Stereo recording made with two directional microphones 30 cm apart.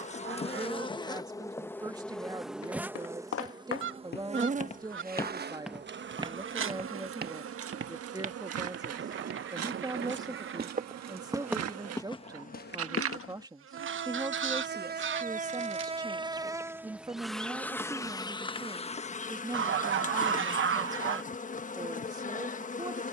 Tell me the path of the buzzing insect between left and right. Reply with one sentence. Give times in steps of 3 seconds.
You can hear the buzzing insect in the centre from 0 s, on the right from 3 s, in the centre from 15 s and on the left from 18 s.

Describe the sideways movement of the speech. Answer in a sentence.
You can hear the speech stay in one place.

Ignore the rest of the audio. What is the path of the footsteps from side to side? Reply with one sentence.
In this clip you hear the footsteps go right and come back.